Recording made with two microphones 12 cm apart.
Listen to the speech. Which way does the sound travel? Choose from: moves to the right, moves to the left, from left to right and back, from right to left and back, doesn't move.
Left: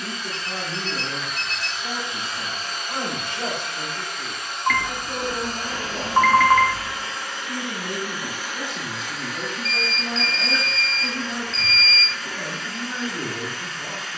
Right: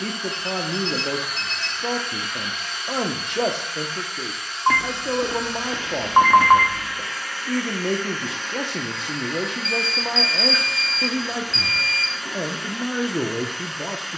doesn't move.